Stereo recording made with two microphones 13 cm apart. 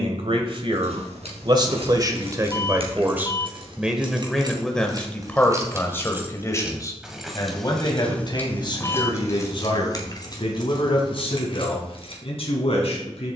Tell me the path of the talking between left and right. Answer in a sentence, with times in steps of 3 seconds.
You can hear the talking on the right from 0 s, in the centre from 3 s and on the left from 6 s.